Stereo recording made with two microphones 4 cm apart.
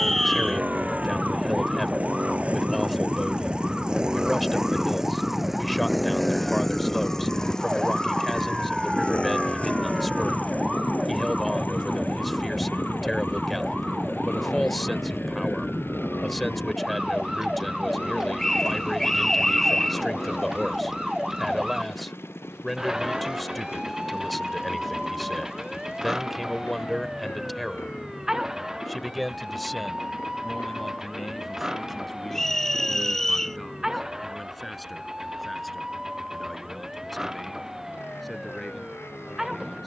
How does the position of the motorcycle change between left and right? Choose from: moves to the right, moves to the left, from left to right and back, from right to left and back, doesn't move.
moves to the left.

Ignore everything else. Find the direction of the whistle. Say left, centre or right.
centre.